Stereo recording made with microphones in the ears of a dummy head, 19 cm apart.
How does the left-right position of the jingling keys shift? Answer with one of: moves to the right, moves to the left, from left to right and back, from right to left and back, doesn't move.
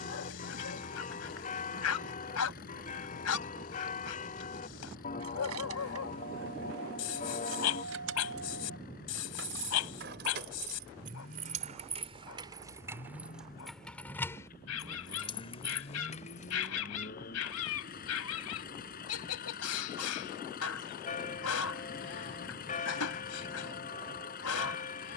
moves to the left.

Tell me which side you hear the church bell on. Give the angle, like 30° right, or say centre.
40° left.